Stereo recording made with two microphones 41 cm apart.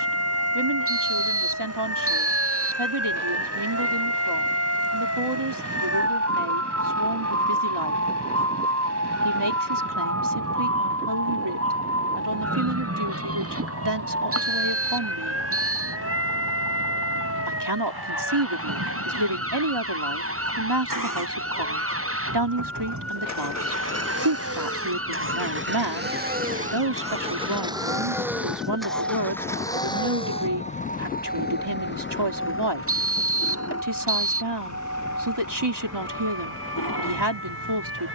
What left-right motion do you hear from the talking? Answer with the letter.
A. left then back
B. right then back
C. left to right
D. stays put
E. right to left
D.